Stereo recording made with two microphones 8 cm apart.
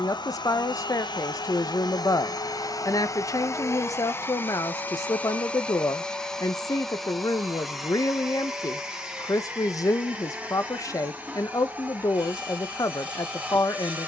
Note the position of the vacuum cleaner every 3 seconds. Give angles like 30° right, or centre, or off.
60° left, 30° left, centre, 10° right, 20° right.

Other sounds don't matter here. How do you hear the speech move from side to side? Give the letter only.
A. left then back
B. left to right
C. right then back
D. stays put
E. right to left
D.